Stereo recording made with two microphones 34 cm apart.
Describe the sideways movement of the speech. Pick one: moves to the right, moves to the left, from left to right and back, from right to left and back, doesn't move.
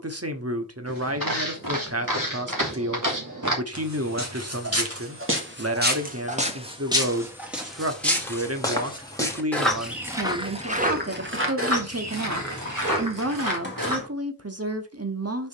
doesn't move.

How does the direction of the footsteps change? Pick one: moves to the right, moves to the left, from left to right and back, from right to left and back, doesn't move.
from right to left and back.